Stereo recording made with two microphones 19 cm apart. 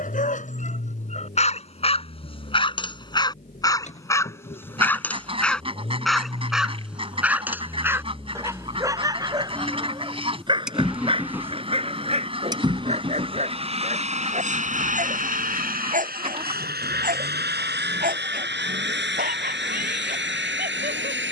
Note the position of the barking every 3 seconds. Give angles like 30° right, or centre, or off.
30° left, 10° left, 10° right, 30° right, 40° right, 40° right, 50° right.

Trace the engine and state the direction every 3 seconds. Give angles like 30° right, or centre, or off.
40° left, 40° left, 20° left, centre, 30° right, 50° right, 70° right.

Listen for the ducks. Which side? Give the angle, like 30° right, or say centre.
30° right.